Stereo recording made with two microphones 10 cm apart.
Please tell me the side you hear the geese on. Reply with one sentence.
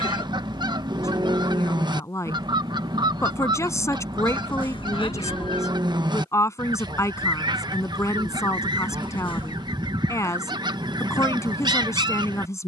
You can hear the geese on the right.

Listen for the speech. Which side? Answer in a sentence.
In this clip you hear the speech on the left.